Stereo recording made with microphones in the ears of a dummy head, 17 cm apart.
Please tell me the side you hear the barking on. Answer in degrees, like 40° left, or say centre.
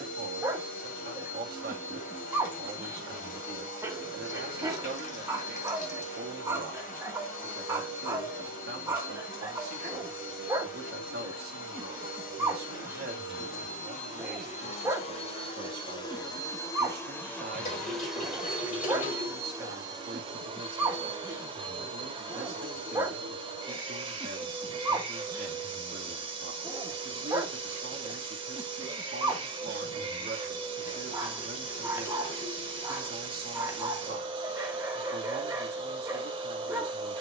10° right.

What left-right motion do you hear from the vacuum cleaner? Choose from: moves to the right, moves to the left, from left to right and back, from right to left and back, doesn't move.
moves to the right.